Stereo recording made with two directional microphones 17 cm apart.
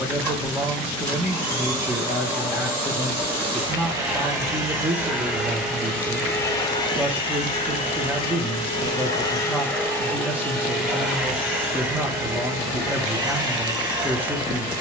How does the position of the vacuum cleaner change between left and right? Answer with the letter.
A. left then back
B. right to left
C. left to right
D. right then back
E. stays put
A.